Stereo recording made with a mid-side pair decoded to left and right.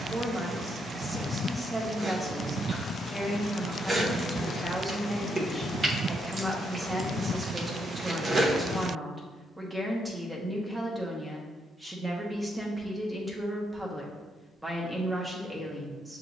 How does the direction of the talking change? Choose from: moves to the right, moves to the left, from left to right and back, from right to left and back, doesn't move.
doesn't move.